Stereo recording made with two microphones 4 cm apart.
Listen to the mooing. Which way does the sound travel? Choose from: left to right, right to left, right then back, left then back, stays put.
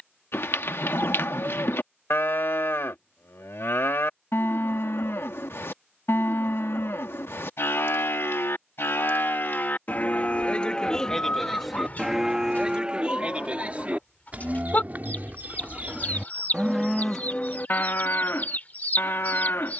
right then back.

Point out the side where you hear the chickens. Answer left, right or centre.
left.